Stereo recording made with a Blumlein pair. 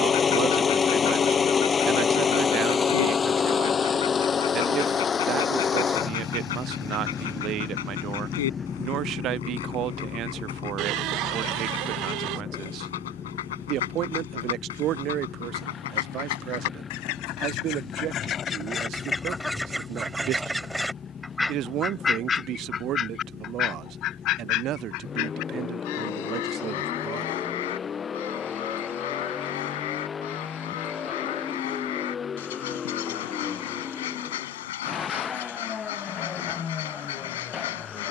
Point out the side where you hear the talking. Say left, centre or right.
right.